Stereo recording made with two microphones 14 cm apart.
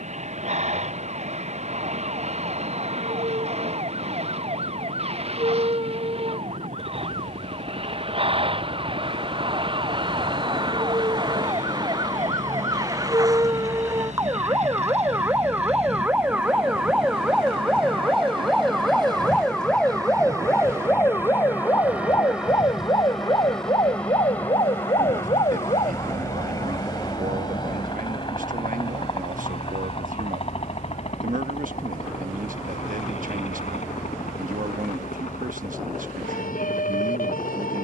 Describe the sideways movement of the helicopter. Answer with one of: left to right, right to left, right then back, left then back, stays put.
right to left.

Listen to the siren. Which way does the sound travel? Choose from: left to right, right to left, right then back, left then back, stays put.
right to left.